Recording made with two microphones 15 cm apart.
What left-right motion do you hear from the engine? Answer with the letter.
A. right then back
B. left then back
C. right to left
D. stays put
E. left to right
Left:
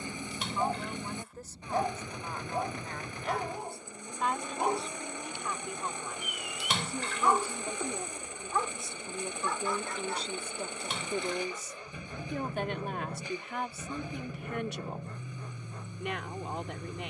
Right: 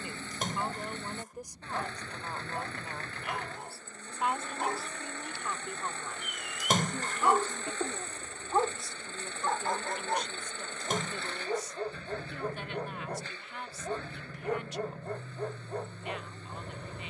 D.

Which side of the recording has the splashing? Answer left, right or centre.
right.